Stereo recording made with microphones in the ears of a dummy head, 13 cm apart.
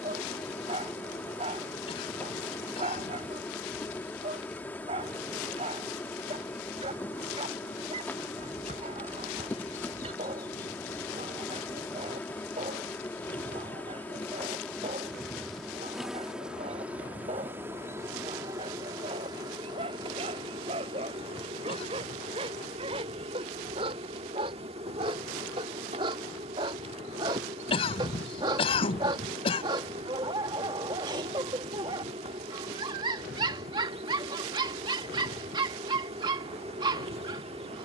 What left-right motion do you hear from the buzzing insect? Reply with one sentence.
You can hear the buzzing insect travel towards the right.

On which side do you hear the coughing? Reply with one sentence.
You can hear the coughing on the left.